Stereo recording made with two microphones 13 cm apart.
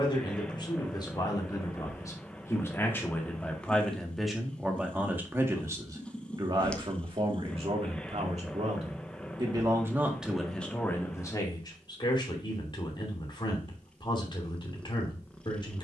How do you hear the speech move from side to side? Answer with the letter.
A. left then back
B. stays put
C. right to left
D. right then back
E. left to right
D.